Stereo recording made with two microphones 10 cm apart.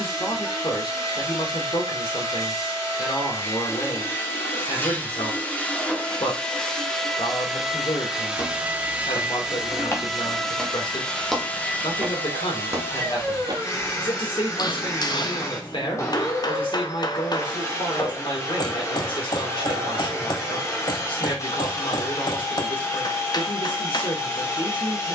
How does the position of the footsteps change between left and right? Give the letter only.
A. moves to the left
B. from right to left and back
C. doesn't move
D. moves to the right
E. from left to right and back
D.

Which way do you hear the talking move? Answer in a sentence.
In this clip you hear the talking stay put.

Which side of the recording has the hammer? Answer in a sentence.
In this clip you hear the hammer on the left.